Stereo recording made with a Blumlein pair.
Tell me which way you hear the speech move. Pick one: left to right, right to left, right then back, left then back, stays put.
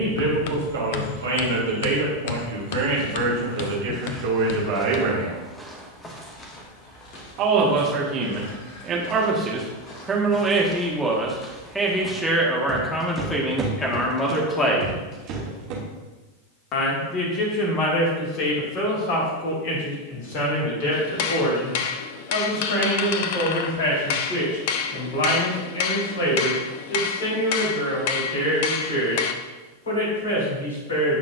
right to left.